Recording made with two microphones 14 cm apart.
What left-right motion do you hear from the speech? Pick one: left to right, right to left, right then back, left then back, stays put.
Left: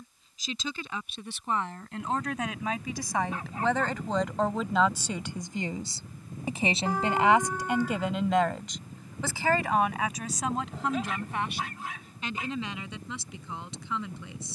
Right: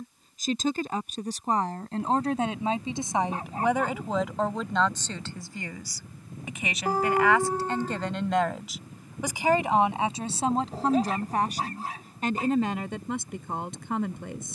left then back.